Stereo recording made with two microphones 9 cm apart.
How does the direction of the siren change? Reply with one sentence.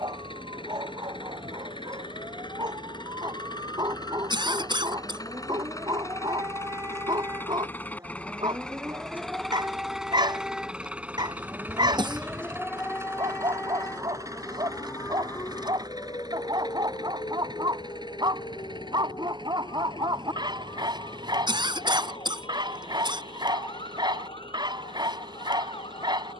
In this clip you hear the siren go from the right side to the left.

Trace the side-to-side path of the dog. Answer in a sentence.
You can hear the dog stay in one place.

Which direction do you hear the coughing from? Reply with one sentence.
In this clip you hear the coughing on the right.